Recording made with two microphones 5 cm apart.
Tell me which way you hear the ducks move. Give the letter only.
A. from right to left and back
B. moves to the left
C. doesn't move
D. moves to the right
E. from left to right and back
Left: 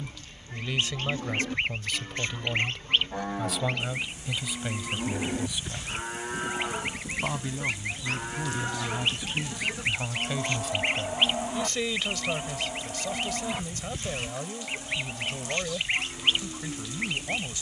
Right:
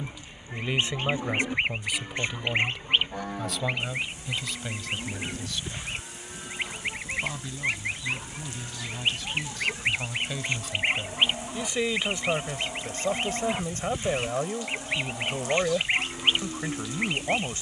C.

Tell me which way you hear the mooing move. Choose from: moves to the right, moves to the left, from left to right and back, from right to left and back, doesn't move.
from right to left and back.